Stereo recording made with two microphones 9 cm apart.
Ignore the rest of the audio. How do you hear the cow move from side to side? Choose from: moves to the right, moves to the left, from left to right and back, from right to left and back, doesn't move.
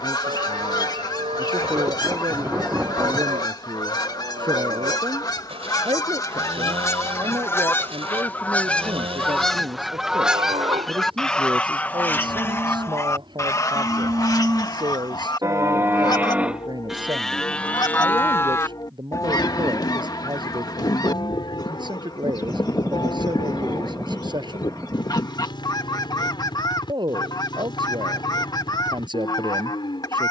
moves to the left.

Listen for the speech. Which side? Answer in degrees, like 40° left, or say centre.
50° right.